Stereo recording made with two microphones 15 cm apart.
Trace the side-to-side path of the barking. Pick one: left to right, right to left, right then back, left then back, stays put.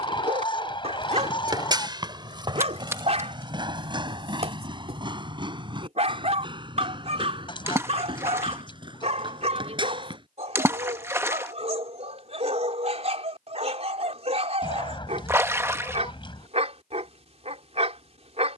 stays put.